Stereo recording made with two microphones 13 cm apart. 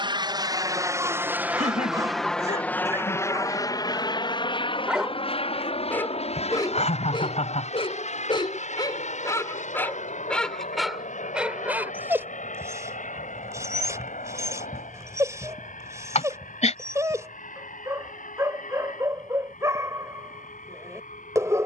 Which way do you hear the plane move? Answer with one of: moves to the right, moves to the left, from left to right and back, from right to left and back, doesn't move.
moves to the left.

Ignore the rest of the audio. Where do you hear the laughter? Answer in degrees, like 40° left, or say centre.
60° left.